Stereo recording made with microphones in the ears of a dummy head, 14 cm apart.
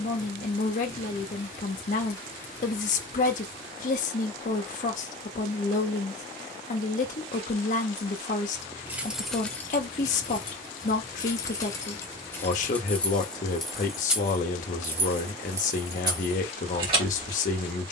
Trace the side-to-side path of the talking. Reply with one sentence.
You can hear the talking stay in one place.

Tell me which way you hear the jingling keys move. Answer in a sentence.
In this clip you hear the jingling keys go left and come back.